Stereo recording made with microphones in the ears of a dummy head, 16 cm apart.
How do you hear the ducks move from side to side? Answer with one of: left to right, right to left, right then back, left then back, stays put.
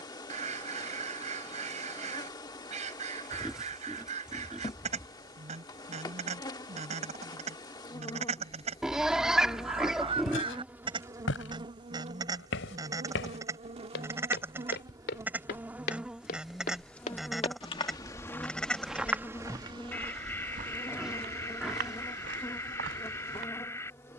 right to left.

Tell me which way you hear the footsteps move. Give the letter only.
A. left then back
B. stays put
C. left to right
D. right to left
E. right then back
C.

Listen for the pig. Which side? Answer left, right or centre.
centre.